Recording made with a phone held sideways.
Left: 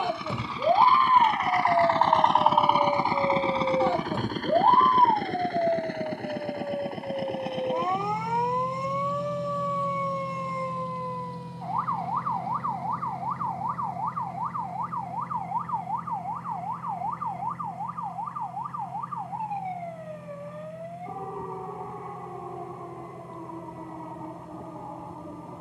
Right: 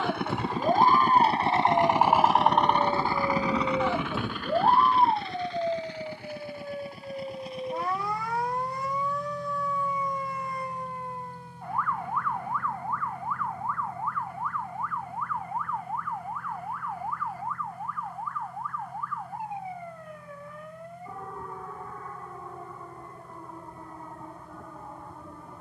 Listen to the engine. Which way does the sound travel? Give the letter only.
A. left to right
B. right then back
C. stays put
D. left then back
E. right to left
E.